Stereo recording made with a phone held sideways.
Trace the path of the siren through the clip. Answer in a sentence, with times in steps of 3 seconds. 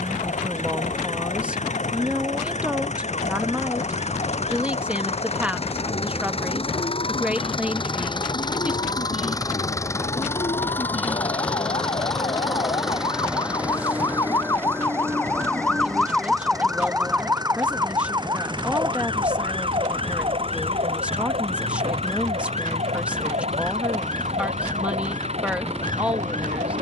In this clip you hear the siren on the left from 0 s, in the centre from 15 s and on the right from 18 s.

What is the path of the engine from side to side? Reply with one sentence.
You can hear the engine go from the left side to the right.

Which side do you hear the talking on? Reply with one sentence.
In this clip you hear the talking in the centre.